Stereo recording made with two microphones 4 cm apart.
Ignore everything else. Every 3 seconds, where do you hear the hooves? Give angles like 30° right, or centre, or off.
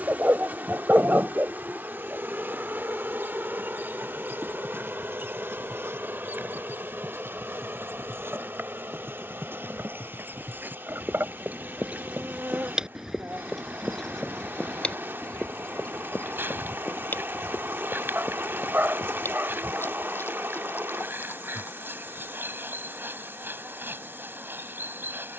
off, 80° right, 70° right, 50° right, centre, 40° left, 60° left, 60° left, off.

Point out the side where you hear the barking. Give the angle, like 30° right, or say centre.
50° right.